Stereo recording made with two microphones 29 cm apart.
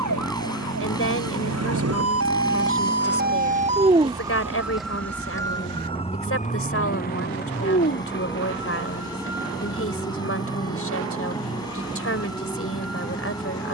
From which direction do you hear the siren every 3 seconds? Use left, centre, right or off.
right, centre, left, left, left.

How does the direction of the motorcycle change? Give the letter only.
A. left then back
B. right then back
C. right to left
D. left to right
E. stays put
E.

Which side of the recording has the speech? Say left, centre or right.
left.